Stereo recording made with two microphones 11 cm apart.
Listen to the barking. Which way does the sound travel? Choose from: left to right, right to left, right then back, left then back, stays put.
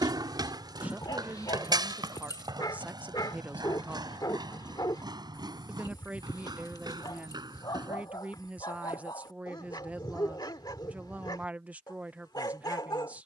stays put.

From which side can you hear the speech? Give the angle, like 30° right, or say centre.
10° right.